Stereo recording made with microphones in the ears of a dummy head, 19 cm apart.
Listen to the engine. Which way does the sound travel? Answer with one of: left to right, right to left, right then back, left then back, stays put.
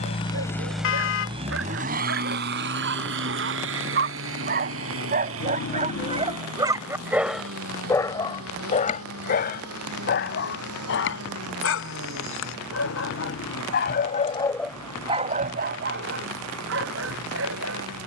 left to right.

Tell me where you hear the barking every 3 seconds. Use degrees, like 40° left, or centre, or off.
70° right, 50° right, centre, 60° left, 50° left, 60° right.